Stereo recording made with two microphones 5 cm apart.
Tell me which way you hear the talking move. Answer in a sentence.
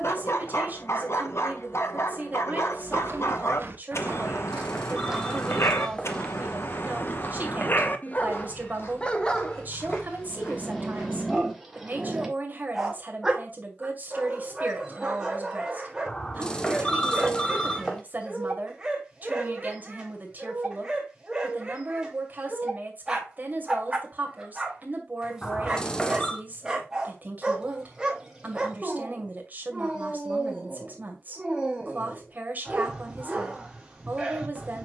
In this clip you hear the talking stay in one place.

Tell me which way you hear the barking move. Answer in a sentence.
You can hear the barking move to the right.